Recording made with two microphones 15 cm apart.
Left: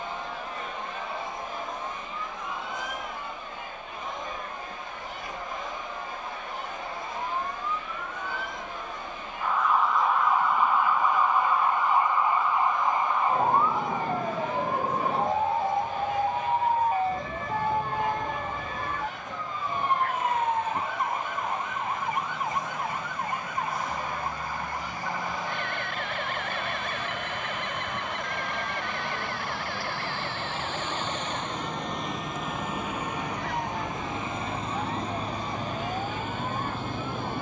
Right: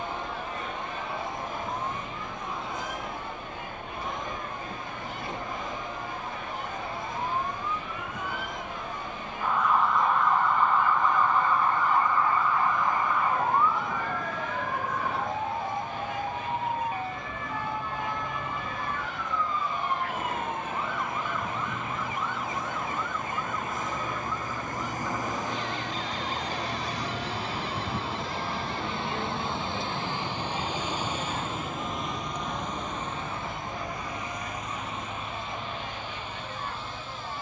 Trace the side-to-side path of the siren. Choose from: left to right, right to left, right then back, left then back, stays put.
right to left.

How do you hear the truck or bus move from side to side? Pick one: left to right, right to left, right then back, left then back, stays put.
right to left.